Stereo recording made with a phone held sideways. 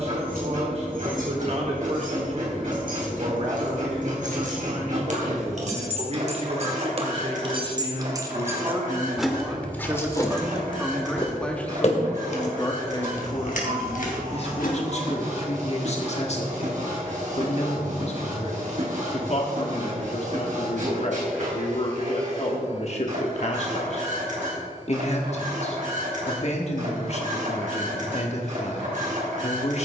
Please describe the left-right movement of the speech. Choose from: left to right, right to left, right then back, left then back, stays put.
right to left.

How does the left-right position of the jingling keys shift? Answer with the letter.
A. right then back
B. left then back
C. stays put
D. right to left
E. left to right
D.